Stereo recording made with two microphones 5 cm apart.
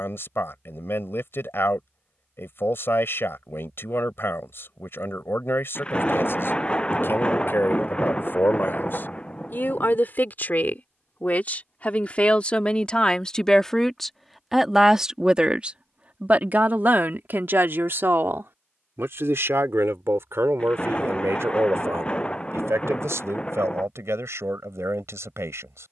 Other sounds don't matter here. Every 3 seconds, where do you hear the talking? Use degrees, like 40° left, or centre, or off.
60° left, 60° left, 60° left, 40° left, 20° left, 40° right, 70° right, 80° right, 80° right.